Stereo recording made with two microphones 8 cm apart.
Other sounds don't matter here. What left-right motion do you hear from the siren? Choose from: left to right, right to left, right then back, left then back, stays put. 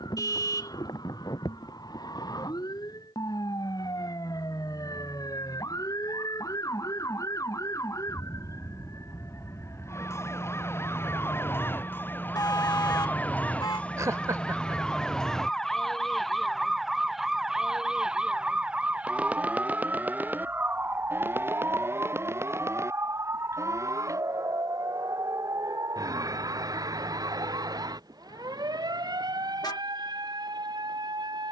left to right.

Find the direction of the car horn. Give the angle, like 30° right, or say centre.
50° left.